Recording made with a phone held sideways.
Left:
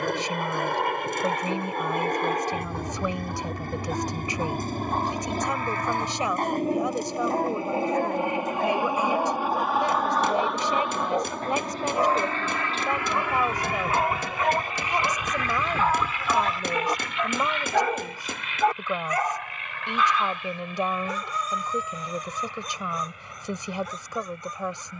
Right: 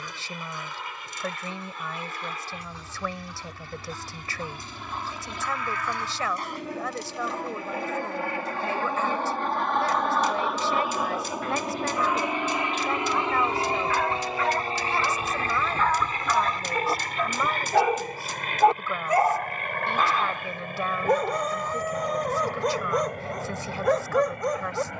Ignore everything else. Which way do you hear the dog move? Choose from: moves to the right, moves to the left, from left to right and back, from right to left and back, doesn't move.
moves to the right.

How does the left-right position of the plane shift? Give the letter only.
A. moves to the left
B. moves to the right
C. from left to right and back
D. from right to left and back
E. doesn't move
B.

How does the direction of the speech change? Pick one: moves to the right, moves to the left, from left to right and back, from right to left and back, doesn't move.
doesn't move.